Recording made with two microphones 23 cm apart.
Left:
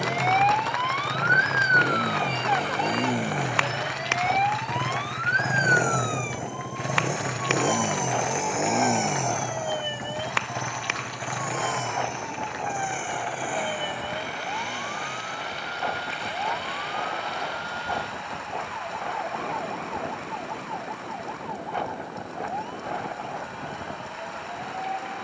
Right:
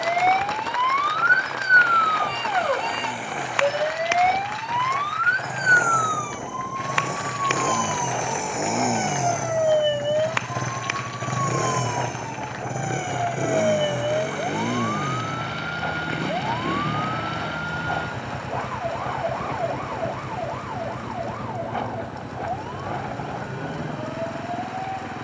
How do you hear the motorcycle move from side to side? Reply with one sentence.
In this clip you hear the motorcycle go from the left side to the right.